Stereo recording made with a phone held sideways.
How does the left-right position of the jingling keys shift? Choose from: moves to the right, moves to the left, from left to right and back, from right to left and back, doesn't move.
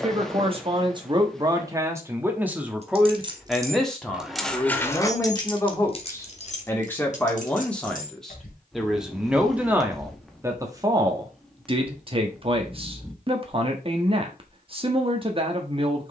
moves to the left.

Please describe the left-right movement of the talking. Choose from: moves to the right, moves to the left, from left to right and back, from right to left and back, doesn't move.
from right to left and back.